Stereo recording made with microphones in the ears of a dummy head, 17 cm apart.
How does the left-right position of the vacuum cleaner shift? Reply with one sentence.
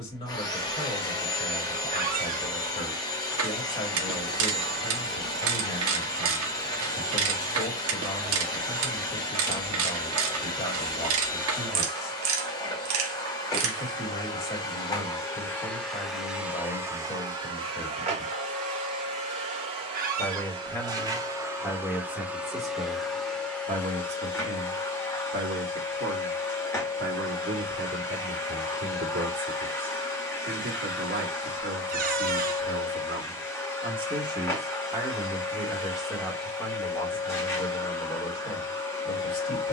You can hear the vacuum cleaner move from left to right and back again.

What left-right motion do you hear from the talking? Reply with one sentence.
You can hear the talking move from left to right and back again.